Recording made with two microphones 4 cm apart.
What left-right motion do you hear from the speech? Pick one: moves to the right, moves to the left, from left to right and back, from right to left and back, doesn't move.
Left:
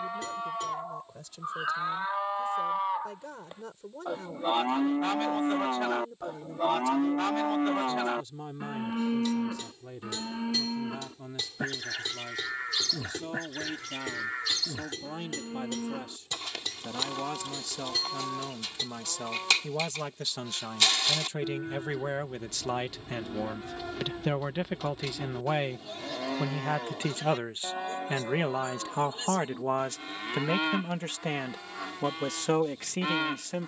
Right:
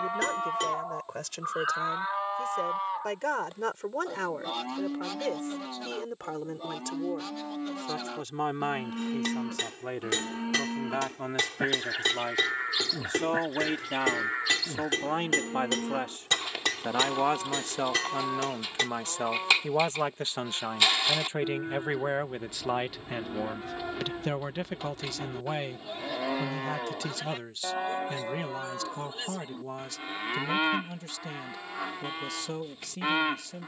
moves to the left.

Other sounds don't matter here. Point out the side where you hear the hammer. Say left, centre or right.
right.